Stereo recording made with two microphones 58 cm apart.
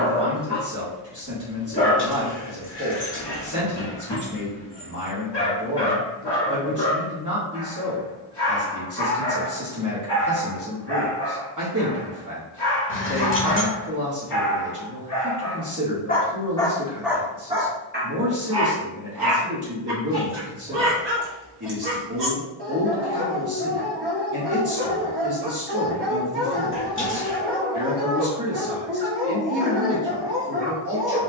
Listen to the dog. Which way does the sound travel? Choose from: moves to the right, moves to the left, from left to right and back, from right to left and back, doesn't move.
moves to the right.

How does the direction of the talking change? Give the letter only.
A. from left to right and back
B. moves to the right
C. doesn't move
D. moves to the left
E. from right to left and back
C.